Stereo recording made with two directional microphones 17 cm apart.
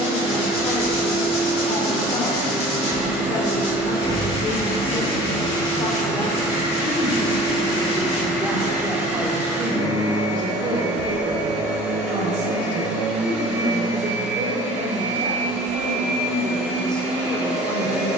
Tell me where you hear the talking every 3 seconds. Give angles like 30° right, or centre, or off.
30° left, 30° left, 10° left, 20° right, 50° right, 10° right.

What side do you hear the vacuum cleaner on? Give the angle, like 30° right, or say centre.
10° right.